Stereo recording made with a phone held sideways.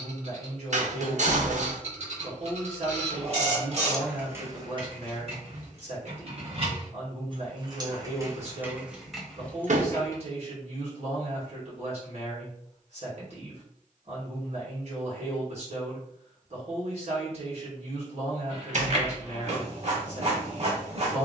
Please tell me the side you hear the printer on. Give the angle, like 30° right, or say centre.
50° right.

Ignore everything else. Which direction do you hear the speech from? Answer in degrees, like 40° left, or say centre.
50° right.